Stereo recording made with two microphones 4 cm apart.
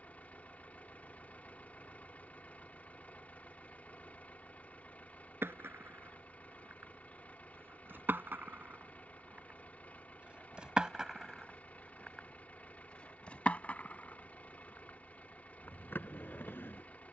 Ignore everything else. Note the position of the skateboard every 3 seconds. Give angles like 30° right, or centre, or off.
off, 70° right, 60° right, 20° right, 30° left, 60° left.